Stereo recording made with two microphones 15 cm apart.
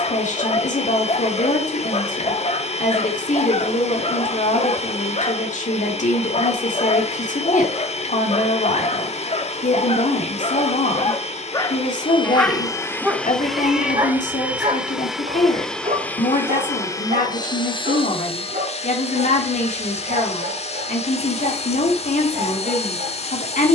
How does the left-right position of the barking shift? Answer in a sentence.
You can hear the barking travel towards the right.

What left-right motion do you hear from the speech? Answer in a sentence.
In this clip you hear the speech stay in one place.